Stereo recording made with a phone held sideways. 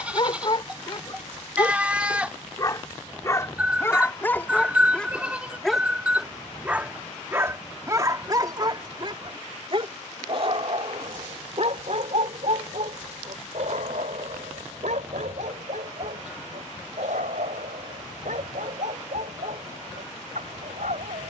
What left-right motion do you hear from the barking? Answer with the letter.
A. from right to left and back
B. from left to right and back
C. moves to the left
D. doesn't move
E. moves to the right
E.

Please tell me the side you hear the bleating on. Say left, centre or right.
centre.